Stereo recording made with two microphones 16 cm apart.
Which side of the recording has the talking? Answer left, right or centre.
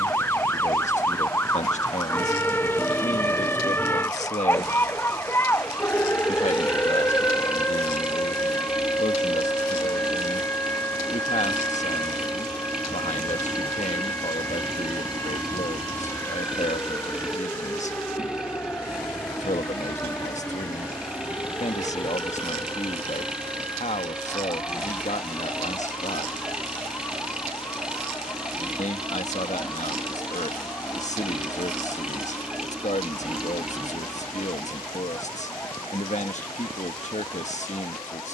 left.